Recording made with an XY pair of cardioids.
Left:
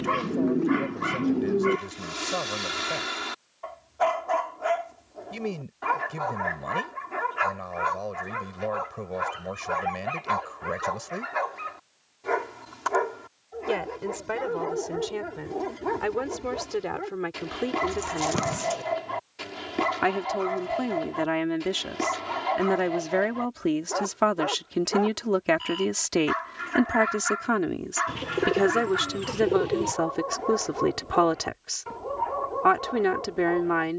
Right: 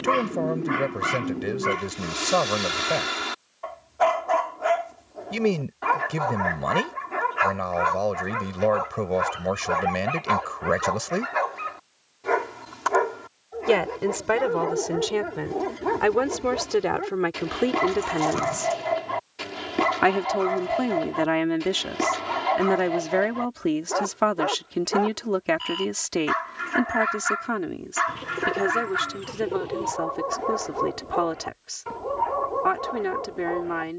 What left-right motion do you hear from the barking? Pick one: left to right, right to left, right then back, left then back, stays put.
stays put.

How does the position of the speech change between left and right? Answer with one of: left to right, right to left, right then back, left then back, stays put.
right to left.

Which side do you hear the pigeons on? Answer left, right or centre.
left.